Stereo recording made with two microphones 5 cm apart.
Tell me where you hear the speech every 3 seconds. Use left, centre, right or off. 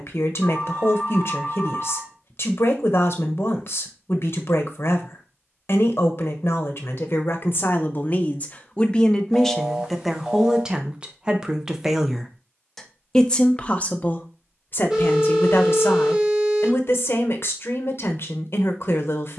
left, left, left, centre, left, left, left.